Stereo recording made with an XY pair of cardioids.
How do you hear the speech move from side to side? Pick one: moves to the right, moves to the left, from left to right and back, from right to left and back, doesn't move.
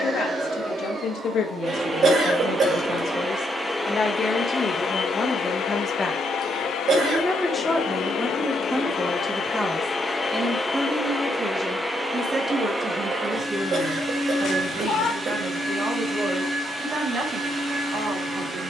moves to the right.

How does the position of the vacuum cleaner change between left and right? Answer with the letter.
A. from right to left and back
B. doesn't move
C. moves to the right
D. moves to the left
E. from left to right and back
A.